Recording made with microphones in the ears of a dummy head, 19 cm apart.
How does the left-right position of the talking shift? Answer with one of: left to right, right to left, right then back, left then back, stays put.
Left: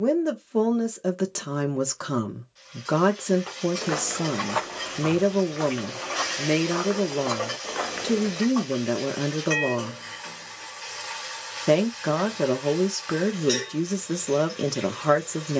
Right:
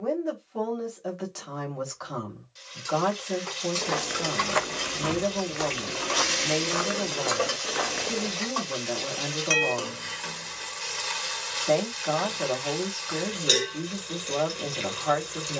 stays put.